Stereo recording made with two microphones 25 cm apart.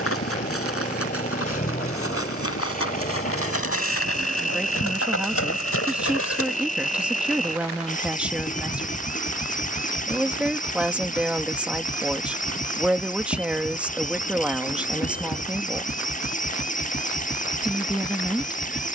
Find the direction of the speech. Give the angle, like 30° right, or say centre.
centre.